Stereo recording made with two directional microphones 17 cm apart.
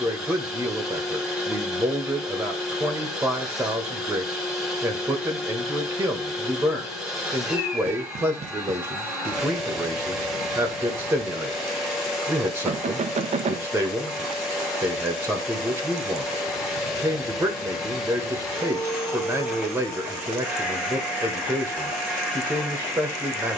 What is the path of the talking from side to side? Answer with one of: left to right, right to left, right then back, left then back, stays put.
stays put.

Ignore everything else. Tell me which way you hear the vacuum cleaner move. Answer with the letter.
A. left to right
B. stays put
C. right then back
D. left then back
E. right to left
B.